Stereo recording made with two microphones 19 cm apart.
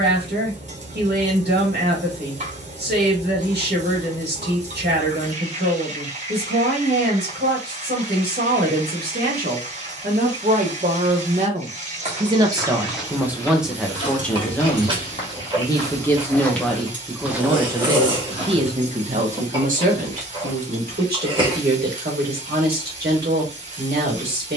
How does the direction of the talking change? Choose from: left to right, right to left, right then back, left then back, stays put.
left then back.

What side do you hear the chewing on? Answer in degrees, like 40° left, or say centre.
30° right.